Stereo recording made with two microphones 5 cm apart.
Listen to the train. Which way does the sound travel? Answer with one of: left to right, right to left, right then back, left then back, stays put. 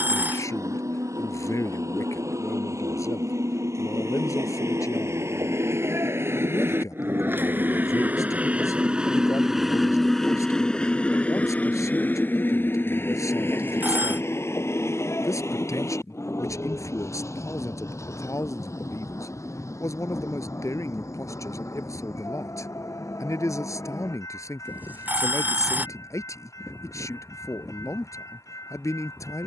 right to left.